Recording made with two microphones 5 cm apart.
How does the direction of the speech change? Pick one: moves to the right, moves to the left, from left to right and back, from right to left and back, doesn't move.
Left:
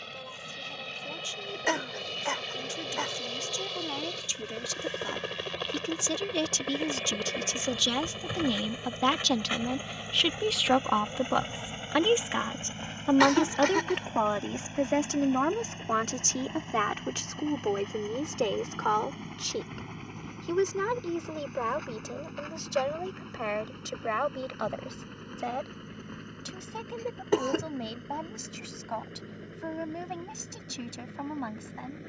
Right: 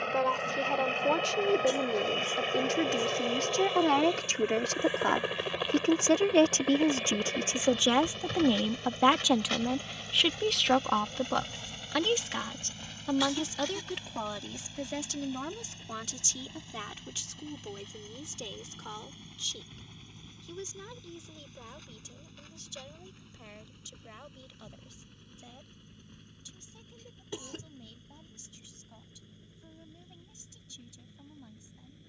moves to the left.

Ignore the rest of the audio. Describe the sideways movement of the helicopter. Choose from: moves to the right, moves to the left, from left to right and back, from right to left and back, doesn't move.
moves to the left.